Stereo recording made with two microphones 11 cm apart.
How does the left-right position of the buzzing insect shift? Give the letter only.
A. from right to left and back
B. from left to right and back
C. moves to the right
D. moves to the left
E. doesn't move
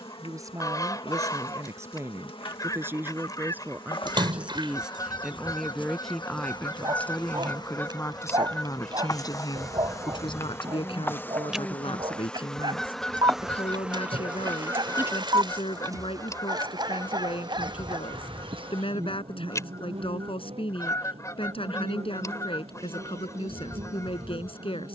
C.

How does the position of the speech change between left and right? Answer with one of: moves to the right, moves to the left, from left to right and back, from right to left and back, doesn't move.
moves to the left.